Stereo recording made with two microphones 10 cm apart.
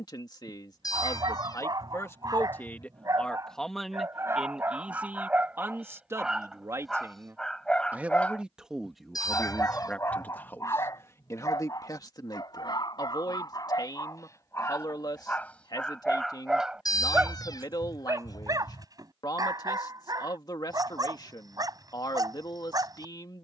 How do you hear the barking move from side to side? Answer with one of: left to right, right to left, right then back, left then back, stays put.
left then back.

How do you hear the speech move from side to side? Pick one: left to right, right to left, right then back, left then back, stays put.
right then back.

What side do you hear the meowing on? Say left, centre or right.
left.